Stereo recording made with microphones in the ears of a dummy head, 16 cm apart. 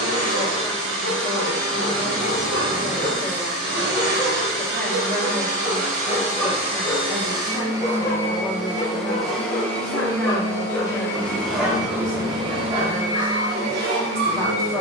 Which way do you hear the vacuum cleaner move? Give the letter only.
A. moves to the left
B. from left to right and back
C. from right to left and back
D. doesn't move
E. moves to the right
C.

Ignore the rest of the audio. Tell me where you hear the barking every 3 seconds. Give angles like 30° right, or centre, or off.
50° right, 30° right, 20° left, 20° left, 40° right.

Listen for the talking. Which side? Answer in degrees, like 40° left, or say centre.
10° left.